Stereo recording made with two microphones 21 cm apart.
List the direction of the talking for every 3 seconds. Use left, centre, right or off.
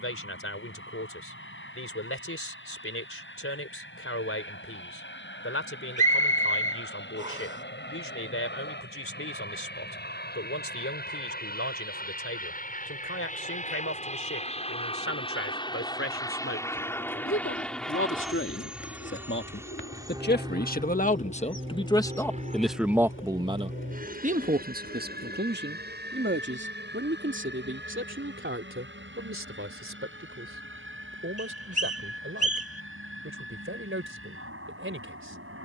left, left, left, left, left, left, left, centre, right, right, right, right.